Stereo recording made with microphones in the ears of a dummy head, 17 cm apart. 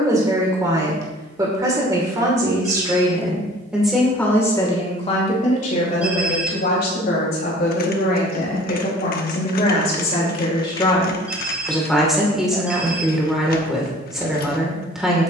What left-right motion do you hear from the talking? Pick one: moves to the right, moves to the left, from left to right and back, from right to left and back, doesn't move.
from right to left and back.